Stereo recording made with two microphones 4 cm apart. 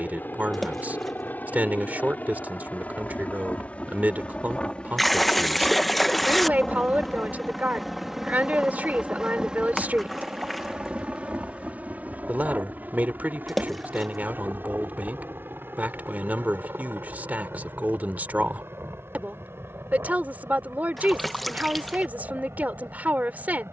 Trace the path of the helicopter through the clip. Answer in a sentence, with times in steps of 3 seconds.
In this clip you hear the helicopter on the left from 0 s, in the centre from 6 s and on the right from 9 s.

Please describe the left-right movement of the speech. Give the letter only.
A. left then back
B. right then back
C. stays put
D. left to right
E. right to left
C.